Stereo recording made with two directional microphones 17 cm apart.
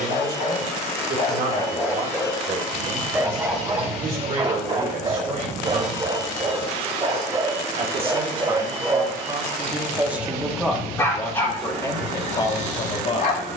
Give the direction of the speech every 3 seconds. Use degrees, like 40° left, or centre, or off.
60° right, 50° right, 30° right, centre, 30° left.